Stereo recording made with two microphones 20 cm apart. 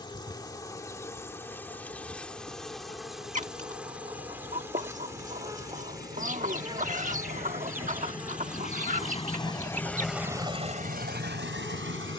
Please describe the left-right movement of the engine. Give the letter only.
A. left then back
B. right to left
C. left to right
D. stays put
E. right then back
C.